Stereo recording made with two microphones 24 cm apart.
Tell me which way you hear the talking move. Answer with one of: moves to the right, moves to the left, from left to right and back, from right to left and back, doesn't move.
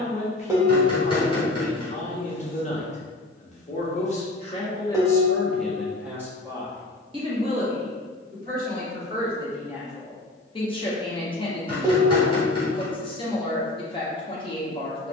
from left to right and back.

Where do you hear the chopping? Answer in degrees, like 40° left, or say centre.
20° left.